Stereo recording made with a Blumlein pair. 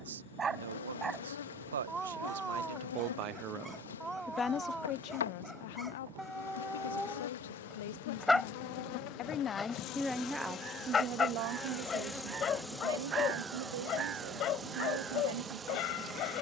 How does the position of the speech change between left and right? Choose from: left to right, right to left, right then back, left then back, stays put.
left then back.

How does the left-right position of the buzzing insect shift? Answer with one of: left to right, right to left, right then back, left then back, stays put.
left to right.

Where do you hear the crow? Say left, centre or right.
right.